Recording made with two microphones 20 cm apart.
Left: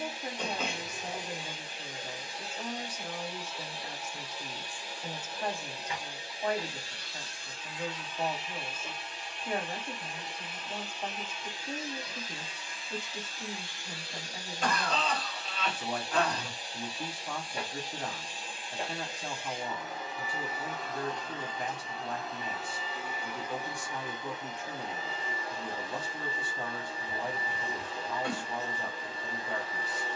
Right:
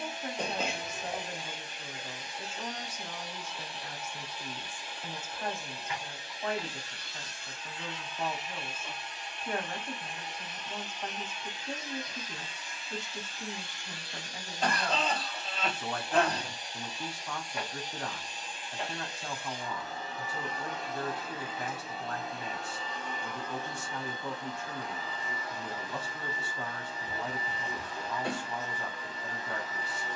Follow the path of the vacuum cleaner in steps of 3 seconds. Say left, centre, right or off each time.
left, left, left, left, left, left, left, centre, left, left.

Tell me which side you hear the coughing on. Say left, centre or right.
right.